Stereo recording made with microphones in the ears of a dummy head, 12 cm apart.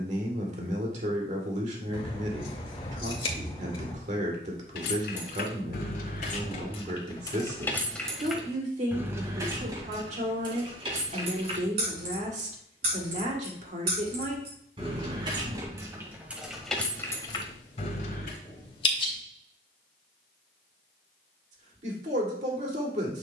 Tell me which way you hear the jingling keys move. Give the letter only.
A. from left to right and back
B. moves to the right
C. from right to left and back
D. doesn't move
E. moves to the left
A.